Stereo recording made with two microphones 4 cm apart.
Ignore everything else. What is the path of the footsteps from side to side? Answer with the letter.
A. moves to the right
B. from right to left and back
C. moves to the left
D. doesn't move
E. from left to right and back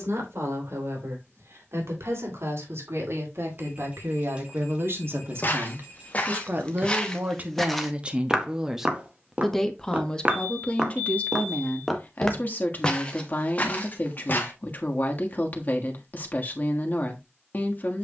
E.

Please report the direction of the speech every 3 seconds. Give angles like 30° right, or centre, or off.
80° right, 70° right, 30° right, 20° left, 40° left, 40° left.